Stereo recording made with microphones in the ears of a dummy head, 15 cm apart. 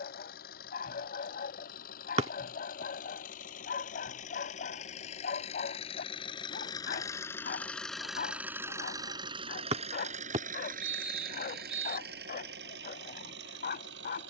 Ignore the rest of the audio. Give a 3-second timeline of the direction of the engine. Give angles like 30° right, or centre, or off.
60° left, 50° left, 10° left, 50° right, 70° right.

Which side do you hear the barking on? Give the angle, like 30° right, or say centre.
50° left.